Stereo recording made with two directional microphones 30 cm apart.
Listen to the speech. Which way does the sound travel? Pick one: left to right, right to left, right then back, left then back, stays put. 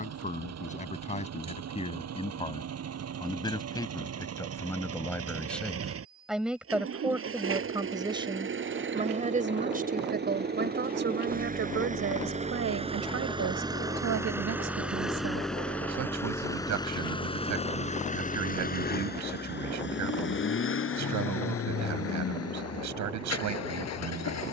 left to right.